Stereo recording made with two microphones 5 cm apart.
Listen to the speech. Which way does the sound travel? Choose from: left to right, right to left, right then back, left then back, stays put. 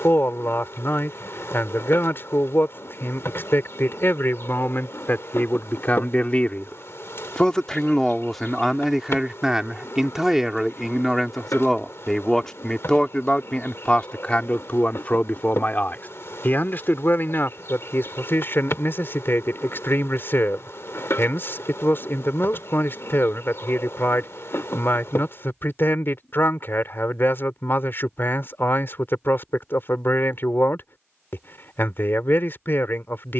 right then back.